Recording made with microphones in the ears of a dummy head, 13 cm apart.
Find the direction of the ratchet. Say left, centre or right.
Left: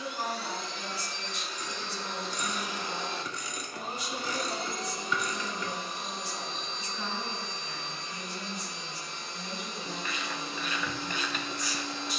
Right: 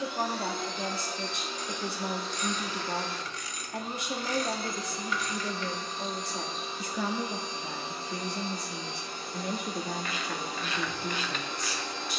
left.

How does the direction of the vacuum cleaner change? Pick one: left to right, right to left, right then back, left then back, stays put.
left then back.